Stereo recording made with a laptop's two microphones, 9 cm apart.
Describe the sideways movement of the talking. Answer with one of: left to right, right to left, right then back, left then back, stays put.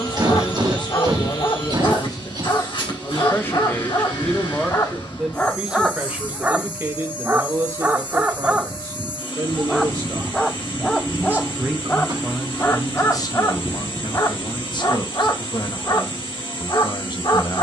right then back.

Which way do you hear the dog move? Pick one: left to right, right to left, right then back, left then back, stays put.
right then back.